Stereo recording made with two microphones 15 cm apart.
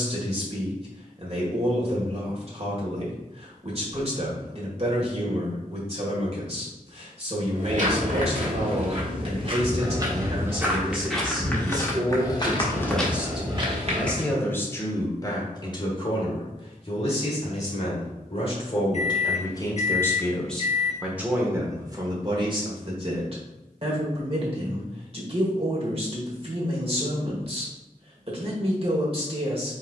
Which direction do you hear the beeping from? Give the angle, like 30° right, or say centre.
50° left.